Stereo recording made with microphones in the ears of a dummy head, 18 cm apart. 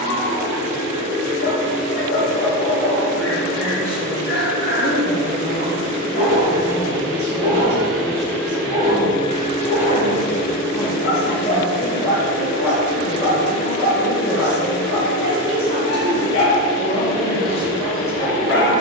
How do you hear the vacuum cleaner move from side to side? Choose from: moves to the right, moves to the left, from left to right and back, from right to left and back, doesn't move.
moves to the left.